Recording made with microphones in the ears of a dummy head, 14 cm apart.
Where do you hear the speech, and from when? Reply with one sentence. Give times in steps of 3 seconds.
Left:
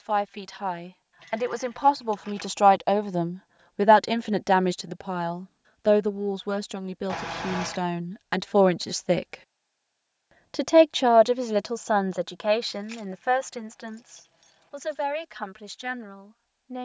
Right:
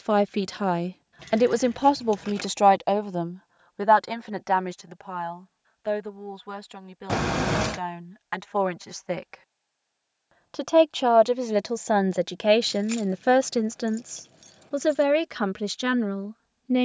You can hear the speech on the right from 0 s, on the left from 3 s, in the centre from 9 s and on the right from 12 s.